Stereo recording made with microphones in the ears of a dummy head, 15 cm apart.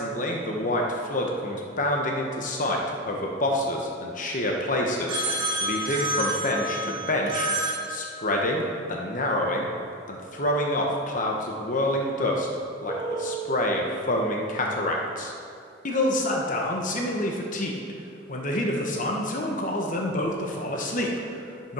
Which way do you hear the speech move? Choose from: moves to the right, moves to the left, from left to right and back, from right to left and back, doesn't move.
doesn't move.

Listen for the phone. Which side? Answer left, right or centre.
right.